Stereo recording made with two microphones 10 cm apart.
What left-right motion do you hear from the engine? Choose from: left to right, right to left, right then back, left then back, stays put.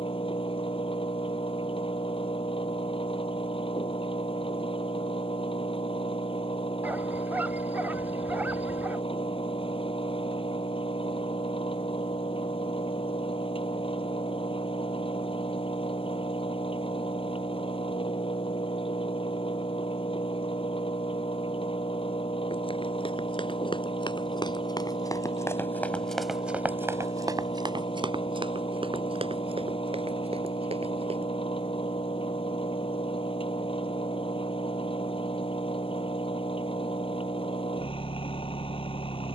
stays put.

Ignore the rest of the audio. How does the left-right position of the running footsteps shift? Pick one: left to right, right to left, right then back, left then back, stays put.
left to right.